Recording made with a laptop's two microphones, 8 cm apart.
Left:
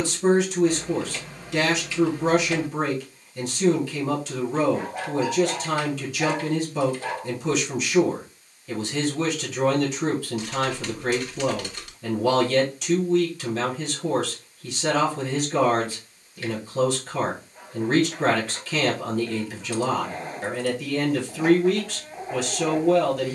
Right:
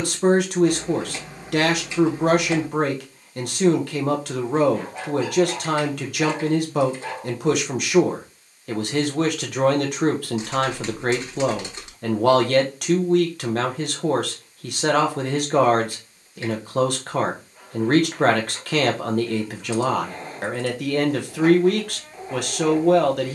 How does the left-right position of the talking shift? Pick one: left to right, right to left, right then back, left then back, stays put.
stays put.